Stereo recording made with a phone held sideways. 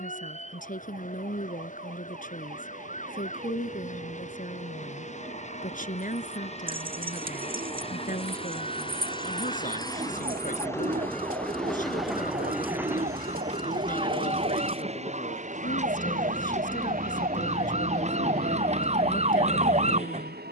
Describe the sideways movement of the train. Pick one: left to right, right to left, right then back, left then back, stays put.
left to right.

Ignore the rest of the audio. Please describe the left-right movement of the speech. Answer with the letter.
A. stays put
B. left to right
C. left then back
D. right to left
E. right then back
A.